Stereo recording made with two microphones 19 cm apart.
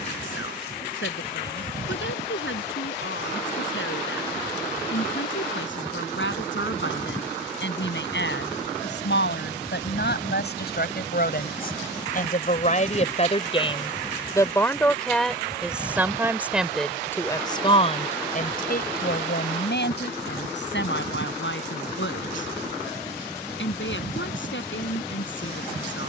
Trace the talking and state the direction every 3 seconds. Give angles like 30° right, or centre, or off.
80° left, 80° left, 70° left, 60° left, 30° left, 10° left, 60° left, 80° left, 80° left.